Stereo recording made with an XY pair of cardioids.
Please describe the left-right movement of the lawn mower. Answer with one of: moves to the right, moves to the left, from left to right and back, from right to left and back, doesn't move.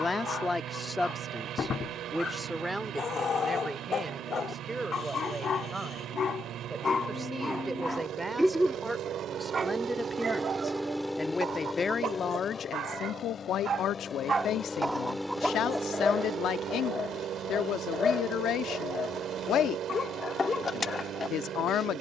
from right to left and back.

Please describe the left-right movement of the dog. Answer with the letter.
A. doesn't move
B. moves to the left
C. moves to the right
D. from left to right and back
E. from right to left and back
D.